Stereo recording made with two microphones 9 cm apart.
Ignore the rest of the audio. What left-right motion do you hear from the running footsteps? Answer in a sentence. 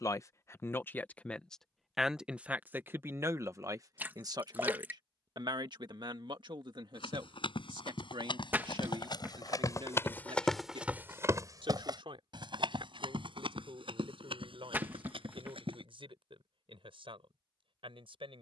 You can hear the running footsteps move from left to right.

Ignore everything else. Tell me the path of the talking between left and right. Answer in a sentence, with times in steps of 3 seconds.
You can hear the talking in the centre from 0 s and on the right from 3 s.